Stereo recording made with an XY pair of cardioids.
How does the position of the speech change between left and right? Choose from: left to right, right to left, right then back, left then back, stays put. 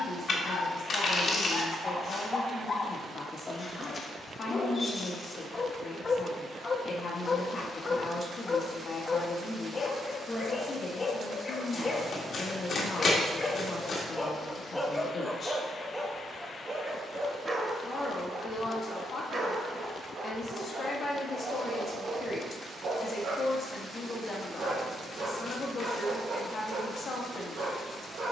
stays put.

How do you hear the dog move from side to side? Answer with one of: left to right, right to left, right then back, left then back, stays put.
left to right.